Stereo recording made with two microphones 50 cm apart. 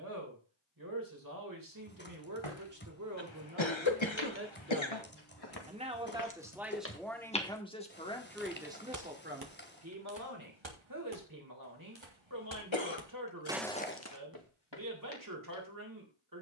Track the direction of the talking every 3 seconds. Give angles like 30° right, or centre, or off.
40° right, 20° right, centre, 30° right, 40° right, 40° right.